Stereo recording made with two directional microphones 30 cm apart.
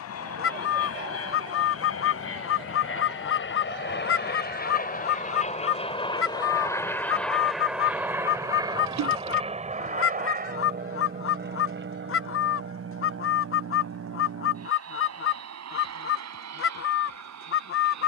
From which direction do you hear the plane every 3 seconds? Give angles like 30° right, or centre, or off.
50° left, 30° left, centre, 30° right, 40° right, 50° right.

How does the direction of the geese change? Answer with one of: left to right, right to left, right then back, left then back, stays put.
stays put.